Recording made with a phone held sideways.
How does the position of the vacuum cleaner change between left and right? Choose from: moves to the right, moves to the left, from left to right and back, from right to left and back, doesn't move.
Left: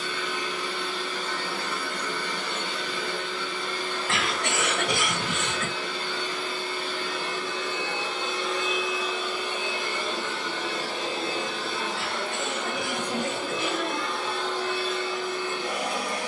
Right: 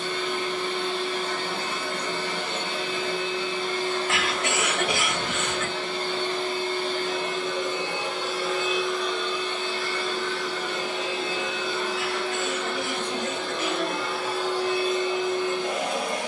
from right to left and back.